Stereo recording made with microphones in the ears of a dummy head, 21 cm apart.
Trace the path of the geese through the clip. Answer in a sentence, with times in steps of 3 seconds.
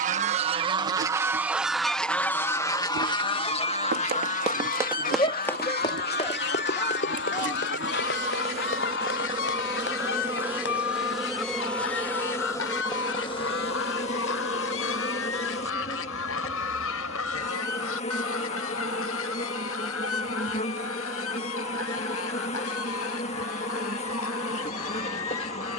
You can hear the geese in the centre from 0 s and on the left from 3 s.